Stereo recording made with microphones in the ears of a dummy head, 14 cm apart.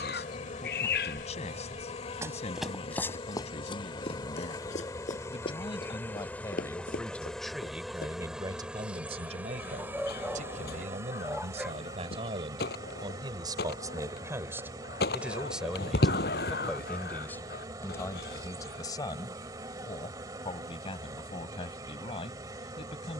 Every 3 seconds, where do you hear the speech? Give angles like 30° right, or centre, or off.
40° left, 40° left, centre, 50° right, 30° right, centre, 30° left, 40° left.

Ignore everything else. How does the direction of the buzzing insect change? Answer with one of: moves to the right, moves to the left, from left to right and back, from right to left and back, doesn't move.
moves to the right.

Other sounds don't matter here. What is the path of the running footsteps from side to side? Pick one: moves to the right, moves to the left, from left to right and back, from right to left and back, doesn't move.
moves to the left.